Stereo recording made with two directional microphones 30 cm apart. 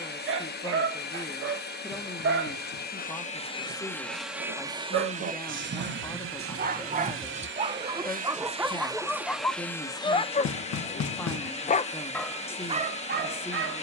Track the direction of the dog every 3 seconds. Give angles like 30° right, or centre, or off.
40° right, 40° right, 20° right, 20° left, 30° right.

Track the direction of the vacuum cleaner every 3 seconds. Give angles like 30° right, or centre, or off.
30° left, 10° right, 30° right, 10° left, 20° left.